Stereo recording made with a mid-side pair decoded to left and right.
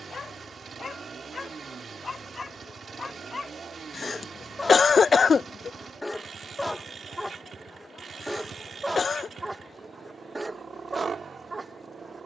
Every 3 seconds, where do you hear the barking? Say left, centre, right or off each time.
left, left, centre, right.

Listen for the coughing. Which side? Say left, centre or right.
left.